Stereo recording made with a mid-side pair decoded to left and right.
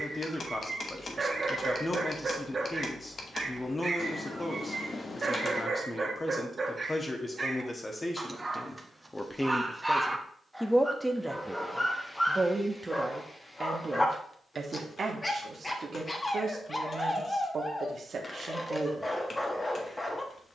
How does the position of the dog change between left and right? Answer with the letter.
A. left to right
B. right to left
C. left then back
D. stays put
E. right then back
B.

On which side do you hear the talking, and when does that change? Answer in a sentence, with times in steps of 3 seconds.
You can hear the talking on the left from 0 s, in the centre from 9 s and on the right from 12 s.